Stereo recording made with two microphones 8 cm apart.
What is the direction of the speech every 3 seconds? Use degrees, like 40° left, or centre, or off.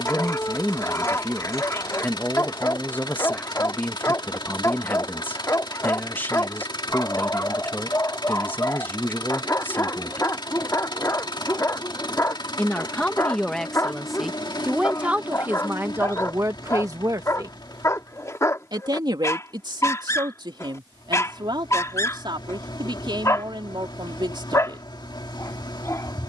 30° left, 30° left, 30° left, 30° left, 10° left, 30° right, 70° right, 70° right, 70° right.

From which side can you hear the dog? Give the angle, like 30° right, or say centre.
40° left.